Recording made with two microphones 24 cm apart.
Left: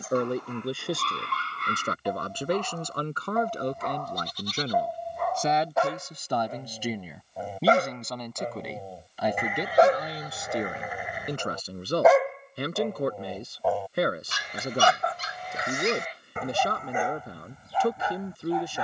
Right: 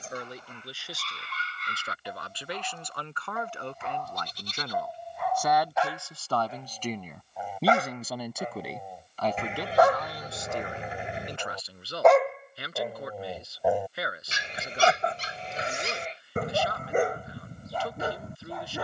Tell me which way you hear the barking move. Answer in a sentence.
You can hear the barking travel towards the right.